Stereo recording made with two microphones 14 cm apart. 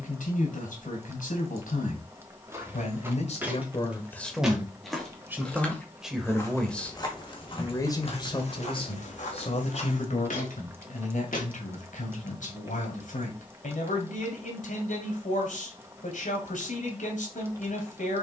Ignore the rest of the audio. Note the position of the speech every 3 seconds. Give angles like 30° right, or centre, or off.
70° left, 10° left, 20° left, 60° left, 70° left, 70° left.